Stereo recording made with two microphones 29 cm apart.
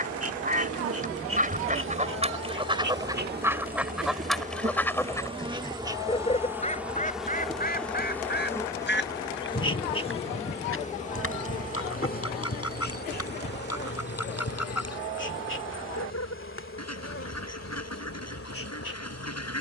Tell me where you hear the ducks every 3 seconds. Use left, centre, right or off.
right, centre, left, left, left, left, left.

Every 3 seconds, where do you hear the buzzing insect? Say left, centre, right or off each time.
right, right, centre, left, left, left, left.